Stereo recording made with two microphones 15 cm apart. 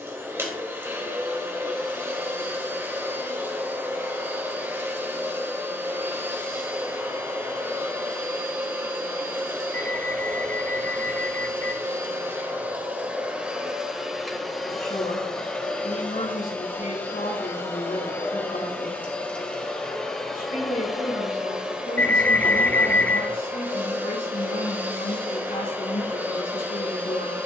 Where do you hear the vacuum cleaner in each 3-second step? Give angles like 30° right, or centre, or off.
20° right, 20° right, 20° right, 20° right, 10° right, 10° left, 10° left, 10° right, 20° right.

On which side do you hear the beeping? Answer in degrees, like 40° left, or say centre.
10° left.